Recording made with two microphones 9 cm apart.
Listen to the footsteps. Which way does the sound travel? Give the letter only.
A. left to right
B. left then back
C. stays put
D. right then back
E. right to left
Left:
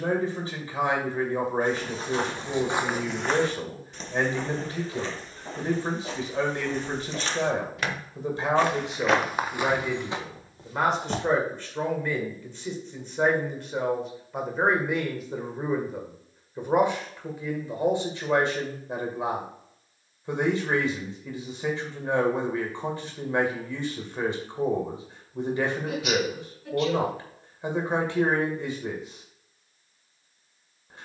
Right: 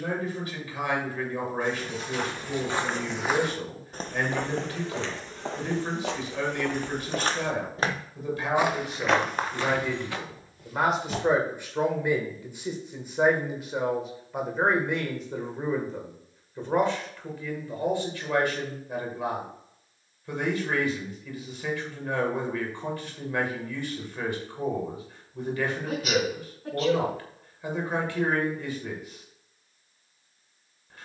D.